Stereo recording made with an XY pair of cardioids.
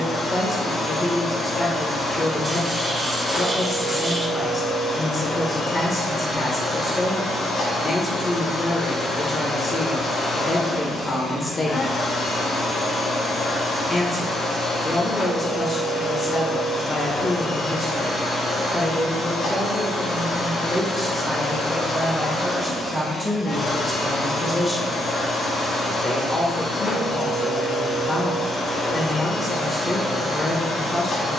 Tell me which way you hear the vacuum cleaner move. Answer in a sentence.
In this clip you hear the vacuum cleaner stay in one place.